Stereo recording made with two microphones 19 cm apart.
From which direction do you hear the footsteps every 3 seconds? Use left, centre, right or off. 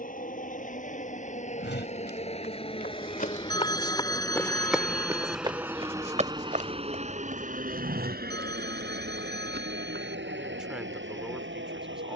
left, centre, right, right.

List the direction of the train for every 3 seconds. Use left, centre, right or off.
left, centre, right, right.